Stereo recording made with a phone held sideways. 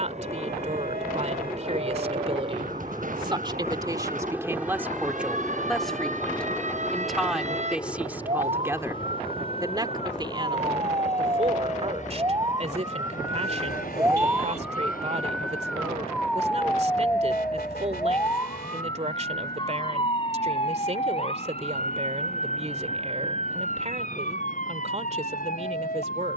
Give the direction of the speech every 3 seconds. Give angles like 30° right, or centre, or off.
40° right, 20° right, 10° right, 30° right, 40° right, 40° right, 40° right, 40° right, 40° right.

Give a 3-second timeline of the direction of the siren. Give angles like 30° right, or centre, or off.
60° right, 60° right, 50° right, 30° right, 20° right, 10° left, 30° left, 40° left, 50° left.